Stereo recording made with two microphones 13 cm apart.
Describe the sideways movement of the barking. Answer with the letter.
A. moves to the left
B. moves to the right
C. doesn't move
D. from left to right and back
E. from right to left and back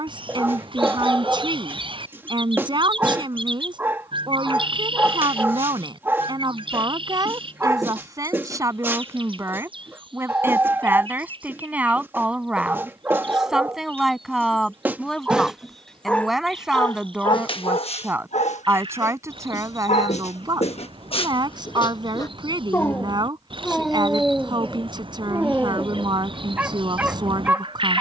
E.